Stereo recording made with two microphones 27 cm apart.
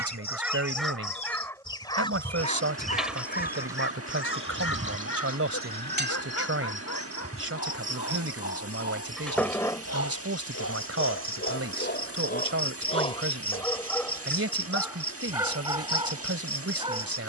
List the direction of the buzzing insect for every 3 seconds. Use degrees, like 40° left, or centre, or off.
20° left, 20° right, 30° right, 20° left, 30° left, 30° left.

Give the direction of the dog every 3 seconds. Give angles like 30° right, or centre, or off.
10° left, 50° left, 80° left, 60° left, 20° left, 20° right.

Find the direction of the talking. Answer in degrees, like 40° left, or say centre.
60° right.